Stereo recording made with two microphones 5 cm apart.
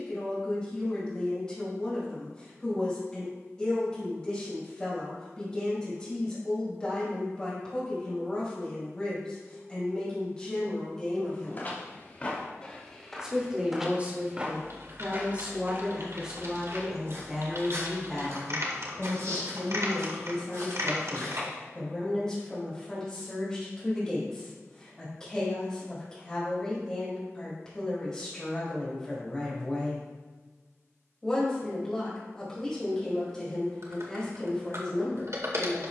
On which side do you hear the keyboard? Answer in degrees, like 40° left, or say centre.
70° right.